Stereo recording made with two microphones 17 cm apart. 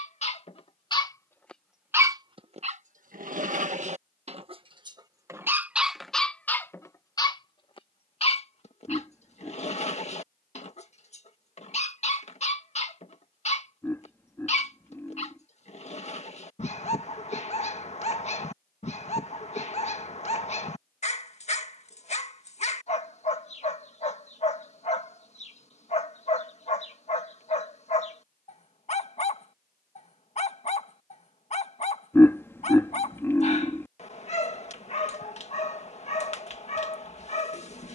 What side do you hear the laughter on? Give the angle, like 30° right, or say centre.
10° left.